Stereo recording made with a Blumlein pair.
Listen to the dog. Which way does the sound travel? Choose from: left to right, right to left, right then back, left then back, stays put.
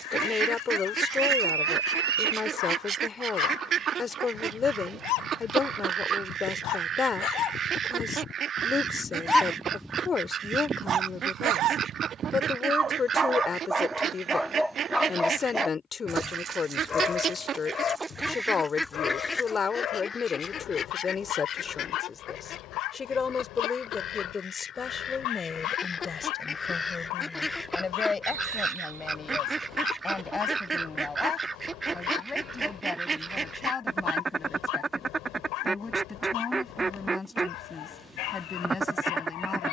right then back.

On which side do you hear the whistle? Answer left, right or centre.
right.